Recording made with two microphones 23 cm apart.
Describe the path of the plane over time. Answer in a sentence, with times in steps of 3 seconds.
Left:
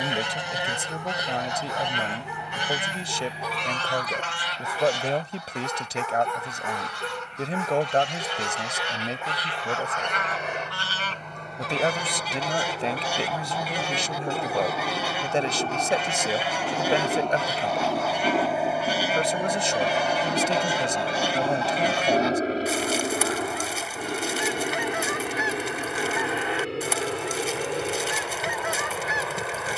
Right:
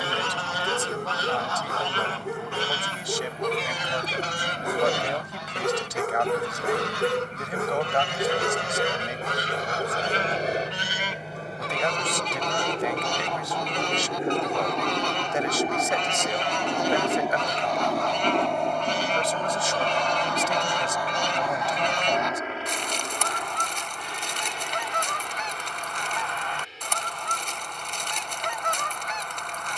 You can hear the plane on the right from 0 s, in the centre from 15 s and on the left from 21 s.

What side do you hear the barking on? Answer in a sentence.
You can hear the barking on the right.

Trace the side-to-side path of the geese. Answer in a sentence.
In this clip you hear the geese move from left to right and back again.